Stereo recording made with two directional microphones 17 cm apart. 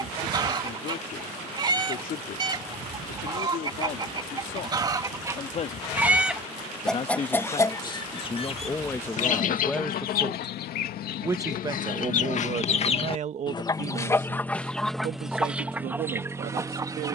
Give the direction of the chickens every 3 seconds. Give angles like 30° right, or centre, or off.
20° right, 20° right, 20° left, 60° left, 30° left, 10° right.